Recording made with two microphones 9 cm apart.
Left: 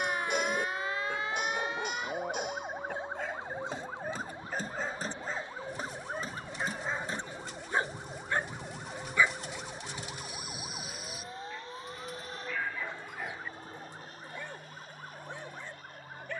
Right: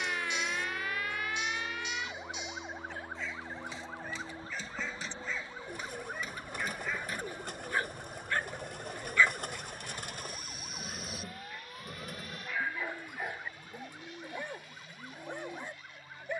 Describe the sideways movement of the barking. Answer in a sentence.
You can hear the barking go from the left side to the right.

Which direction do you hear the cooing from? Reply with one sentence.
You can hear the cooing on the right.